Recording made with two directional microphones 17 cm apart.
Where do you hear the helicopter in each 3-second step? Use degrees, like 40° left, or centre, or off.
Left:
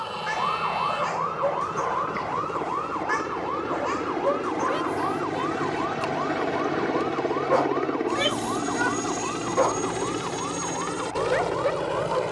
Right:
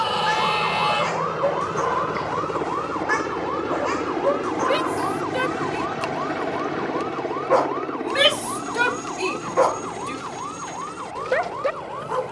40° right, 20° right, 10° left, 40° left.